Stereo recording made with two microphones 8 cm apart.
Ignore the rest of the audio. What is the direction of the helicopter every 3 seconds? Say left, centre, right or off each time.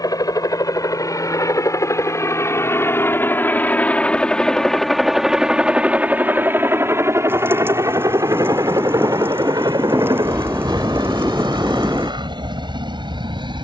left, centre, right, right, right.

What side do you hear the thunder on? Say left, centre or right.
right.